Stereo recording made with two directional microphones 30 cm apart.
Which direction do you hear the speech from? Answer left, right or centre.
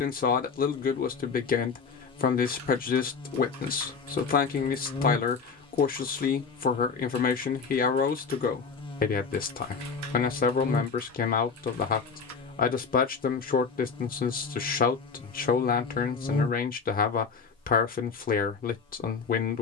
left.